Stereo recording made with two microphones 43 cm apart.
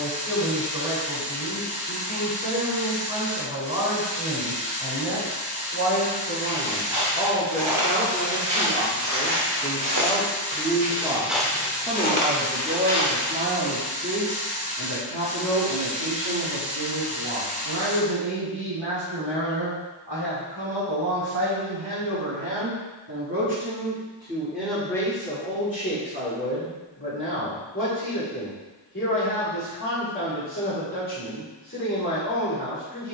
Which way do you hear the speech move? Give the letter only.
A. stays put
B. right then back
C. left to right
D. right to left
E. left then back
B.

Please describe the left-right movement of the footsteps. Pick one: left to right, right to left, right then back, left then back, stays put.
right to left.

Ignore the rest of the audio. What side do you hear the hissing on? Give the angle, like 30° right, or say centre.
10° right.